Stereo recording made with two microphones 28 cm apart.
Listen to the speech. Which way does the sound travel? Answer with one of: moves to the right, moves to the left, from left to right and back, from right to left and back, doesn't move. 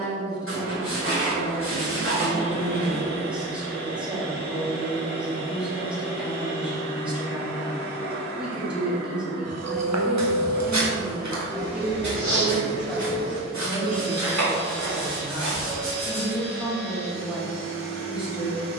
doesn't move.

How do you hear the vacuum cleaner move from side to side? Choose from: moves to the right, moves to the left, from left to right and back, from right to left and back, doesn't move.
doesn't move.